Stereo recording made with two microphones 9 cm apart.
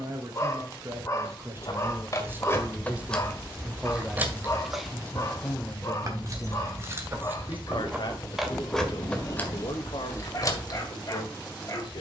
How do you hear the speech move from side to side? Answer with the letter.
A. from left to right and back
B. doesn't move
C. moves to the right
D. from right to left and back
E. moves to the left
E.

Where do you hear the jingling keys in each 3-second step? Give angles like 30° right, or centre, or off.
30° left, 10° right, 20° right, 30° left.